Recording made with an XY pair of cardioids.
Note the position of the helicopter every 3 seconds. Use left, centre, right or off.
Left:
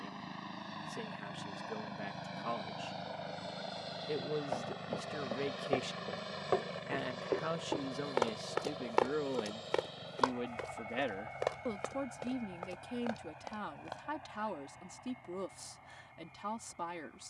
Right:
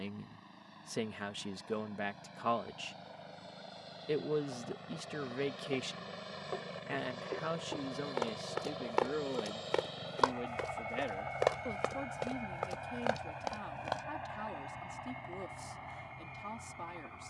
left, left, centre, right, right, right.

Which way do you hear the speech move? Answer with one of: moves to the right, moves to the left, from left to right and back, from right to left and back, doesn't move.
moves to the left.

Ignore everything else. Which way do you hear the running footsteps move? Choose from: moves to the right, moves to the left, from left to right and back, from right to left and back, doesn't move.
moves to the right.